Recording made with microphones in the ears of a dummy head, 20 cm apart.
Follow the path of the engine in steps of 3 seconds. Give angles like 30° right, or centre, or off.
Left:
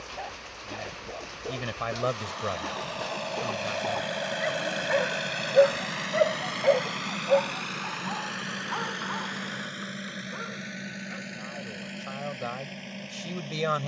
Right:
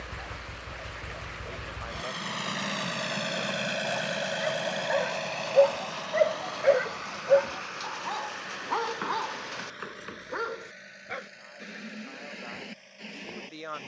50° right, centre, 50° left, 60° left, 70° left.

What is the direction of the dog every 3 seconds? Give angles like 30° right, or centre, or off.
70° left, 40° left, 30° right, 70° right, 70° right.